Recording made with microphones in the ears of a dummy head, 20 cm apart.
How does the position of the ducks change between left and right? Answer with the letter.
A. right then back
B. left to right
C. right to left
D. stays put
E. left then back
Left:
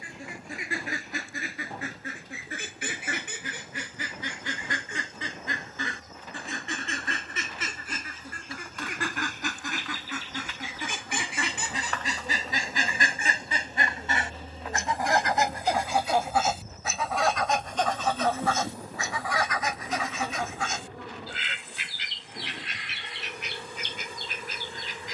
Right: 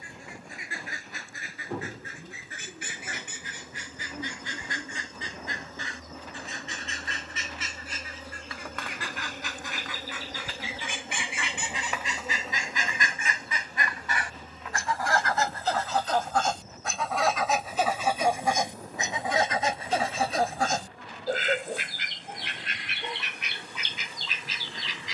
B.